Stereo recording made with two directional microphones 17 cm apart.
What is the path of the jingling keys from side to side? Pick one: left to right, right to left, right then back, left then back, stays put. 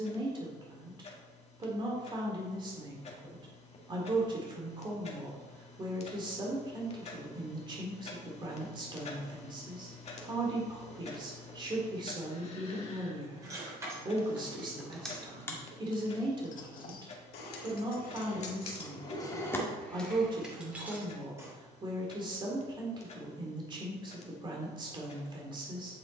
left then back.